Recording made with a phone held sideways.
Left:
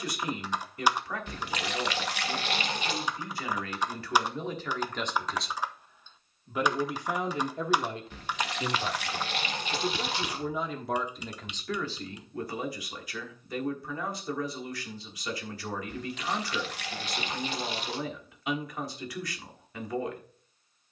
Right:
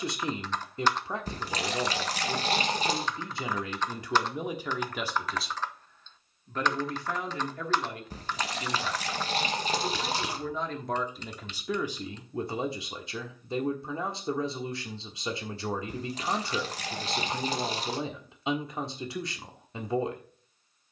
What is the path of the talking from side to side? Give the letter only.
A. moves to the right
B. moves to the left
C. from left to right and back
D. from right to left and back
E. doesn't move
D.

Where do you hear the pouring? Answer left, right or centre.
right.